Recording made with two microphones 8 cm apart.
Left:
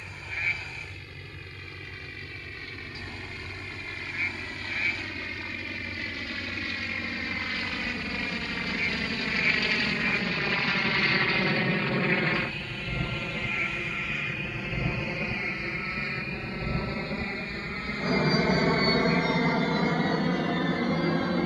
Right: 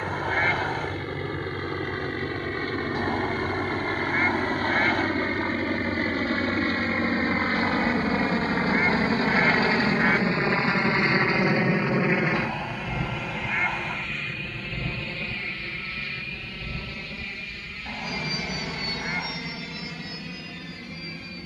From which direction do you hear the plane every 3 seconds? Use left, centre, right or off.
right, right, right, right, centre, left, left.